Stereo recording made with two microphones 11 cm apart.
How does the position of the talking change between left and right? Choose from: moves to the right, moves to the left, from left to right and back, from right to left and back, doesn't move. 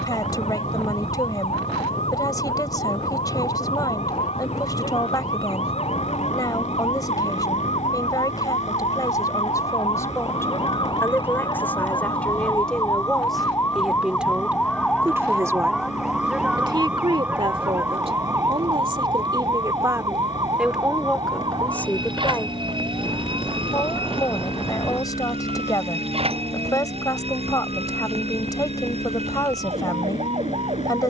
from left to right and back.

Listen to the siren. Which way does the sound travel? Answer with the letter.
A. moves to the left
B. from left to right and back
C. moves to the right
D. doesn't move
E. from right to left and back
C.